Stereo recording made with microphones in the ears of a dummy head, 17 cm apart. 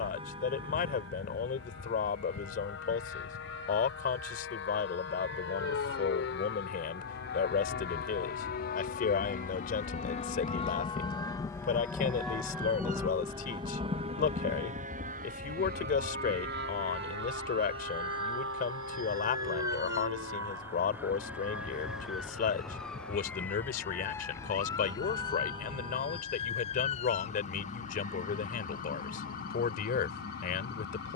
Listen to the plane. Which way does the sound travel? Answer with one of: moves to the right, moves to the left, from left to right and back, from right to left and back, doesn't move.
moves to the right.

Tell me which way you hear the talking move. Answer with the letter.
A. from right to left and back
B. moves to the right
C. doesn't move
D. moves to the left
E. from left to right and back
C.